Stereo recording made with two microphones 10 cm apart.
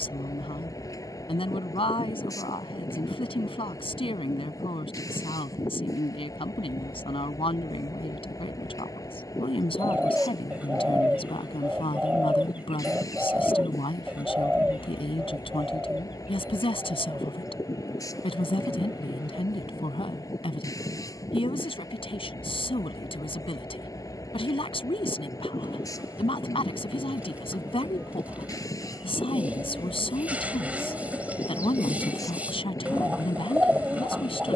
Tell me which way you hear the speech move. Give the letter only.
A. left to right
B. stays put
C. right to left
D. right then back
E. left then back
B.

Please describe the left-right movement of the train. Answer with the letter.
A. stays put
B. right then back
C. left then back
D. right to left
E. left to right
A.